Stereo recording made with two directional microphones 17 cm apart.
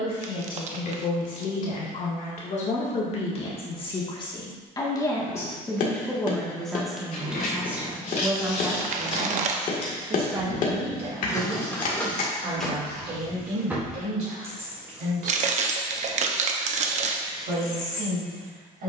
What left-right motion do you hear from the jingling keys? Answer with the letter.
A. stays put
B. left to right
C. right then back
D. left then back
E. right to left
C.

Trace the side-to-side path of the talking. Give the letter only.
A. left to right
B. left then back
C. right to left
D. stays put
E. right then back
A.